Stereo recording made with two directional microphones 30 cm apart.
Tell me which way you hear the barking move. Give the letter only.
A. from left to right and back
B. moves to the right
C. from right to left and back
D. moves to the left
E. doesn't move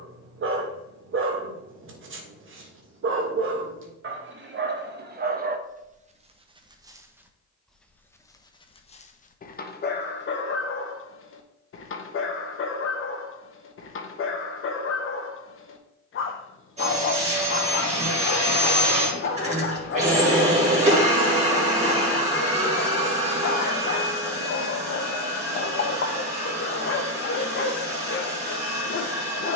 D.